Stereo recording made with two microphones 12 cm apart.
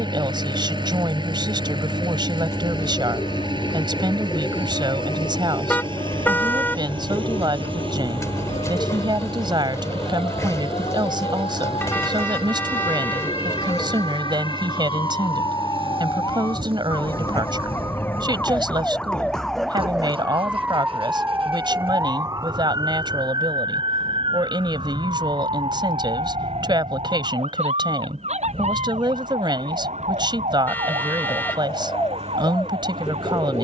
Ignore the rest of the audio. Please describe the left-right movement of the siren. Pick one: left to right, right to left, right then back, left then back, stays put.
left to right.